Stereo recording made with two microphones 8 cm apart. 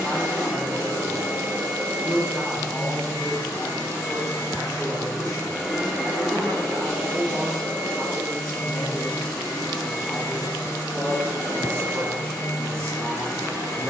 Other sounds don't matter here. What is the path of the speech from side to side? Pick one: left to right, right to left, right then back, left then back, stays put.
right then back.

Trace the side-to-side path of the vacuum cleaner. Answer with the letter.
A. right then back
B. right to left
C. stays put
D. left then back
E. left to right
D.